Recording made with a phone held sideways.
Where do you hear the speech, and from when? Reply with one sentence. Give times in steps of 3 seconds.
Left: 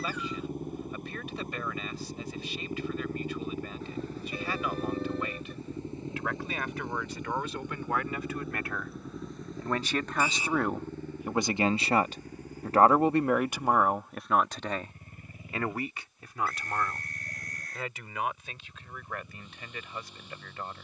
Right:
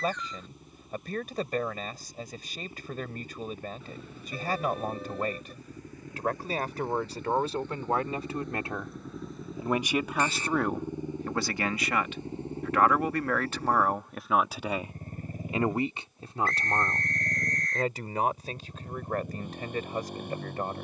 You can hear the speech on the right from 0 s, in the centre from 9 s and on the right from 15 s.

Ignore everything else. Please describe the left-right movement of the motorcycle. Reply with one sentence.
You can hear the motorcycle move from left to right.